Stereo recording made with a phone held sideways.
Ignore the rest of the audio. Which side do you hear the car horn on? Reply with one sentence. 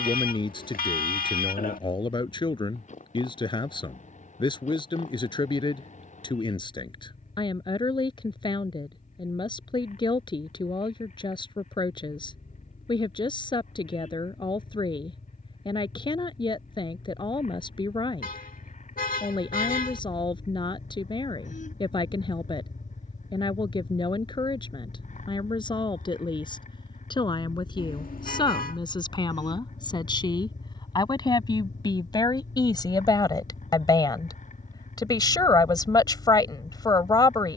In this clip you hear the car horn on the left.